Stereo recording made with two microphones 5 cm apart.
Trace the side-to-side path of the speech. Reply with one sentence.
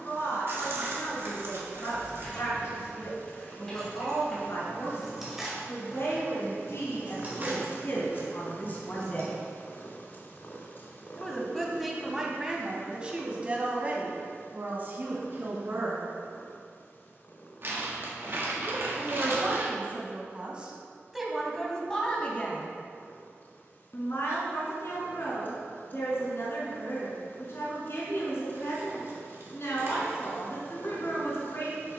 You can hear the speech go right and come back.